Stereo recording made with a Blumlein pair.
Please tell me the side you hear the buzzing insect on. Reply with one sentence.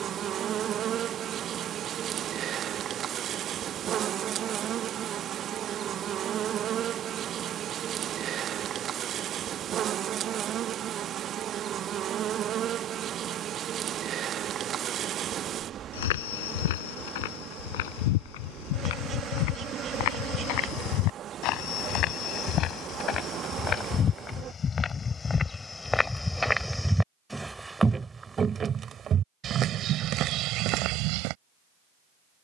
You can hear the buzzing insect on the right.